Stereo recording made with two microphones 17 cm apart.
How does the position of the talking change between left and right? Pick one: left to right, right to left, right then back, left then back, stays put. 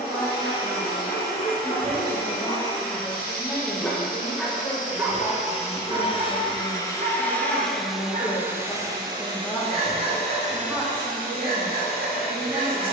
left then back.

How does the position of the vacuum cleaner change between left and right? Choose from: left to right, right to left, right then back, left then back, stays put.
left to right.